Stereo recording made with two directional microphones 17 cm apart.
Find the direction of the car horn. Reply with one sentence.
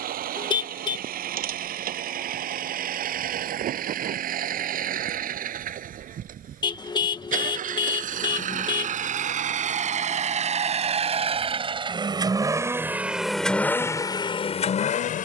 In this clip you hear the car horn on the left.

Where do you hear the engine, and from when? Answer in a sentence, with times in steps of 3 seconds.
In this clip you hear the engine on the right from 0 s and in the centre from 12 s.